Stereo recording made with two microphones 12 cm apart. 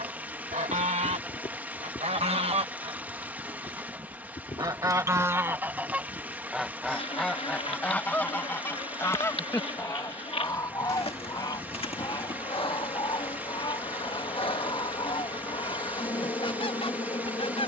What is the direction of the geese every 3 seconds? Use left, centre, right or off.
right, right, centre, left, left, left.